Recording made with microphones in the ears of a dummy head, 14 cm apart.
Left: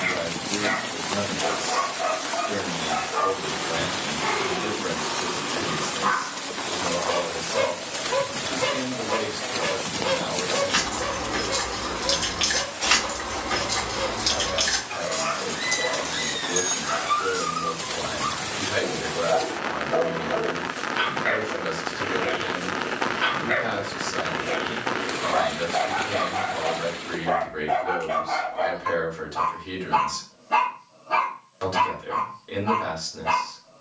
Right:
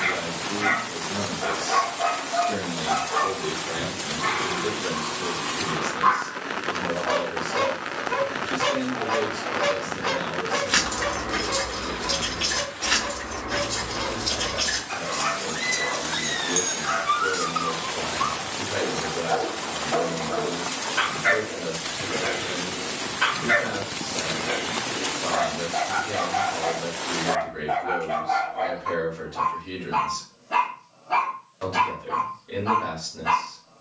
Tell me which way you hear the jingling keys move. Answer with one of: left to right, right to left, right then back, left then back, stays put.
left then back.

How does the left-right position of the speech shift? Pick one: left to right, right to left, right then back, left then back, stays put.
right to left.